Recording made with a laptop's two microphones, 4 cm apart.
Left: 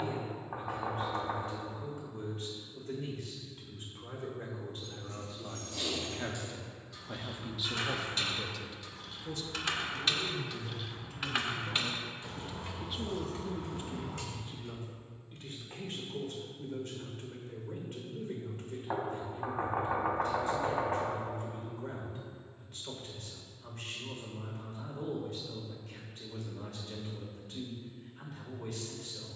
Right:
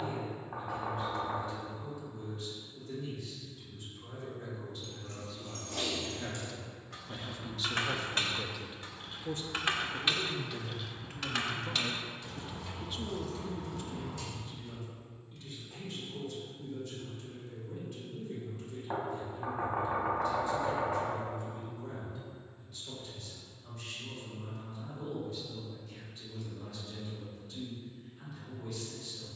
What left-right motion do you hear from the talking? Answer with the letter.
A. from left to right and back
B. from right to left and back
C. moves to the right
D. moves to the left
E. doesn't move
A.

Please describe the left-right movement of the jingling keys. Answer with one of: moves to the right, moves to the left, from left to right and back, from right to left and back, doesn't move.
moves to the left.